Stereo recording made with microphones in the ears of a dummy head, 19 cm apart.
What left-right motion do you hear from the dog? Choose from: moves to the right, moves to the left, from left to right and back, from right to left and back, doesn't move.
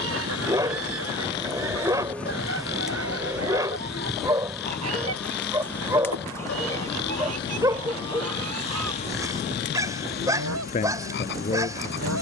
doesn't move.